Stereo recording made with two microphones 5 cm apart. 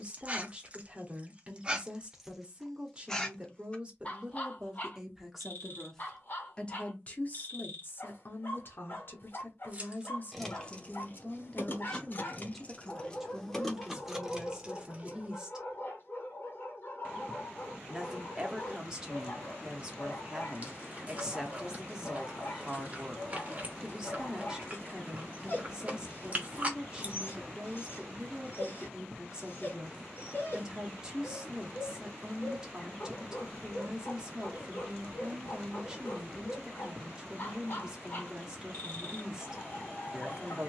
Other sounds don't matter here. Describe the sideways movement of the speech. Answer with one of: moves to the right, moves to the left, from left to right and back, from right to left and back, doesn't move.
from right to left and back.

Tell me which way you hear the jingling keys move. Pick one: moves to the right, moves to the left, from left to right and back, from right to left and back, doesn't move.
from right to left and back.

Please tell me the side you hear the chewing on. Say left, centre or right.
right.